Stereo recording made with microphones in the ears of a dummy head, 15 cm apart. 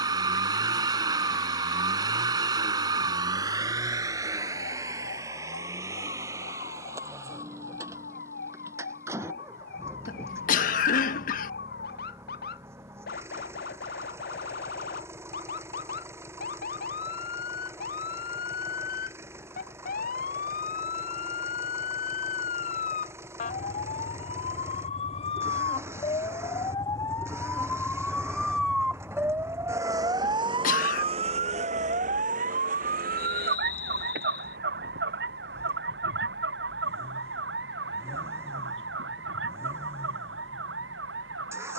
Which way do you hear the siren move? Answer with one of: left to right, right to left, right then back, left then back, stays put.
left to right.